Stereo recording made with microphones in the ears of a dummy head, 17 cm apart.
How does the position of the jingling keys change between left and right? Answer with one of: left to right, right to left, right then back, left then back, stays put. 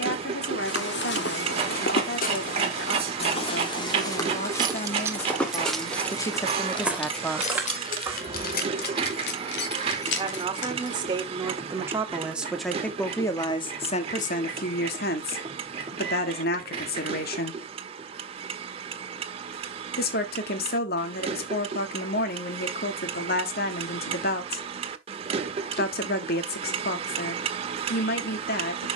right to left.